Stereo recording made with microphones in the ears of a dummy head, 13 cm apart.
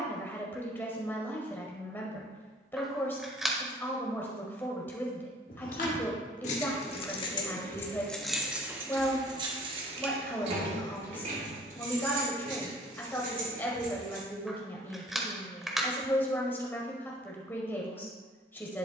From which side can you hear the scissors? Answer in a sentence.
In this clip you hear the scissors in the centre.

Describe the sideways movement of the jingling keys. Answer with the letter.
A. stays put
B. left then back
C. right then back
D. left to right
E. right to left
D.